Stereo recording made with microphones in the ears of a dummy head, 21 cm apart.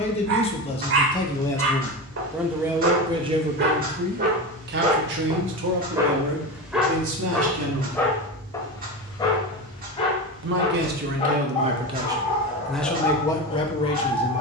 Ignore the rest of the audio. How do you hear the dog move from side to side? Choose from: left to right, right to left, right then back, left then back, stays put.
right to left.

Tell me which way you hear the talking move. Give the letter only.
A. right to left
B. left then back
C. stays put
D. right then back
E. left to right
D.